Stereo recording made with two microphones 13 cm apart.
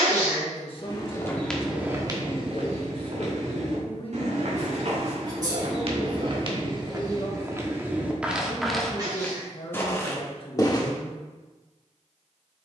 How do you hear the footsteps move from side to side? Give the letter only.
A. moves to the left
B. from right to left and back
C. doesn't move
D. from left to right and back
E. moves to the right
D.